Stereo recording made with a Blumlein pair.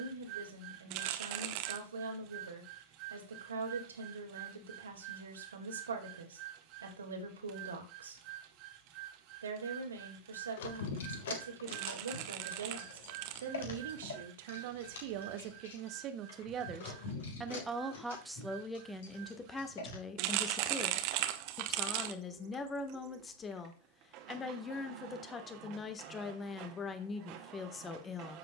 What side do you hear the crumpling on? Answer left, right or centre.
right.